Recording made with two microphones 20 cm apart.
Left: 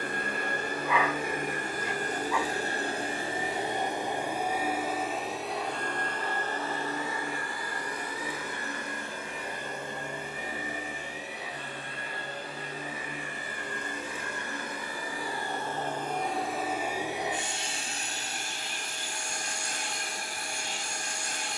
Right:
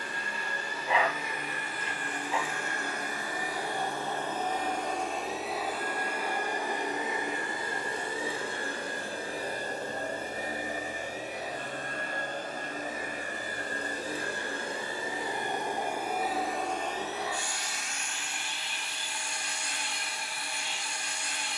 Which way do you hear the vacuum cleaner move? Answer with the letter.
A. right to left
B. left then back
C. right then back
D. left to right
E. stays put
C.